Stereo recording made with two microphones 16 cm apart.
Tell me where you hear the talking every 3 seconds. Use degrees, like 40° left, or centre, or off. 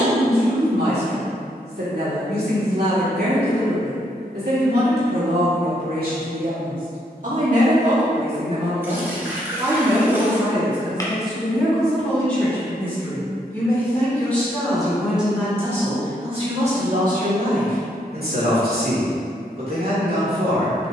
80° right, 80° right, 50° right, 10° right, 10° left, 40° right, 80° right.